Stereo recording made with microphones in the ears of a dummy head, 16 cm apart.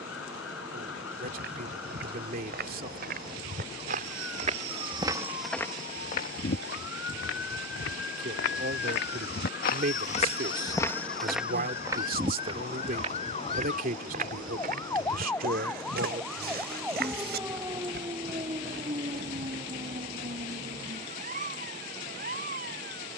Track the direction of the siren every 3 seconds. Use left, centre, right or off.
left, left, left, left, left, centre, right, right.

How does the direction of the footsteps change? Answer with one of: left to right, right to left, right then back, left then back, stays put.
left then back.